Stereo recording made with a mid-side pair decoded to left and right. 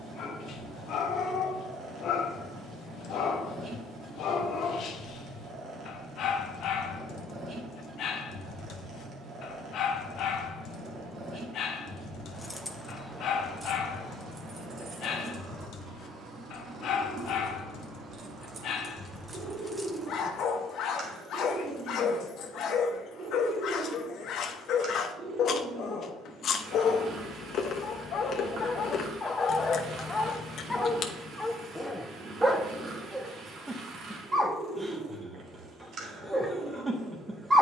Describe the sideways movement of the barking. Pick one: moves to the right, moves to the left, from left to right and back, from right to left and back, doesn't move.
moves to the right.